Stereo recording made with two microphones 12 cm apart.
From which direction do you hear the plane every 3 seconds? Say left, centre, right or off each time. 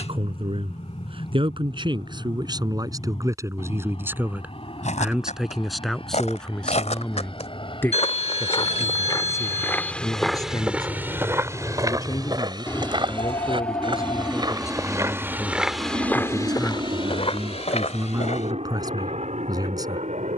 left, left, left, left, centre, right, right.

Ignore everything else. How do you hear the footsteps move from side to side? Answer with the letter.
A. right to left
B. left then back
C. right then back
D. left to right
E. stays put
C.